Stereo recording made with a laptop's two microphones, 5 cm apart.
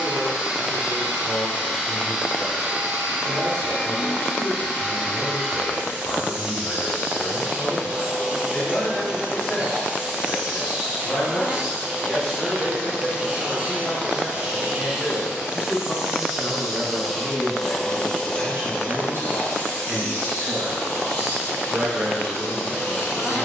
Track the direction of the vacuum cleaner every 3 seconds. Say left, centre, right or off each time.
right, right, right, right, right, centre, left, left.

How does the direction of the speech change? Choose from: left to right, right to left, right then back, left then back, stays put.
left to right.